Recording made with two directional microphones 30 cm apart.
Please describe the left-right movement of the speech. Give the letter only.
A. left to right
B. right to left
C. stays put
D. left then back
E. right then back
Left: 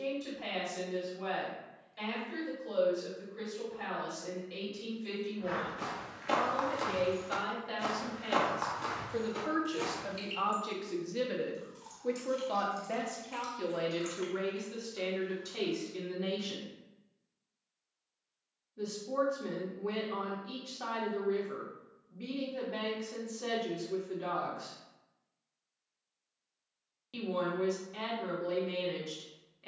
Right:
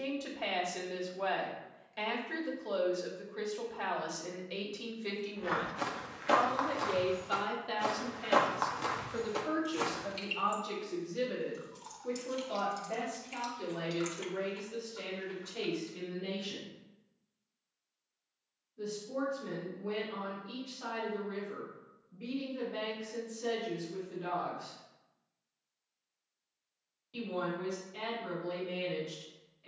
B.